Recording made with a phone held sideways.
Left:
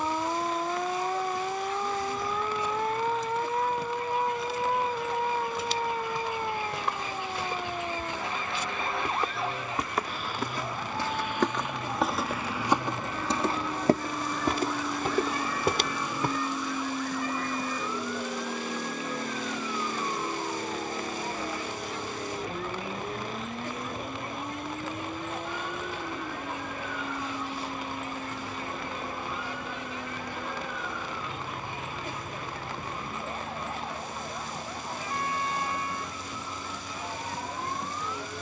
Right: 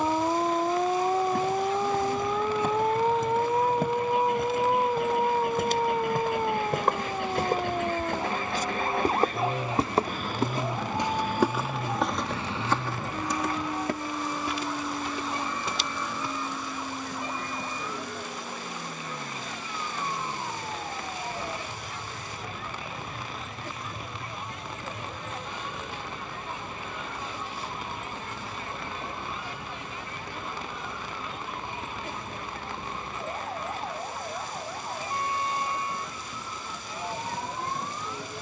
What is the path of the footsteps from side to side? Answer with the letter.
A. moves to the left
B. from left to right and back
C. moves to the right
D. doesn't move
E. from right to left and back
A.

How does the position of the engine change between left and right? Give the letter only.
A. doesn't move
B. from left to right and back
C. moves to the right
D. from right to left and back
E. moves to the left
E.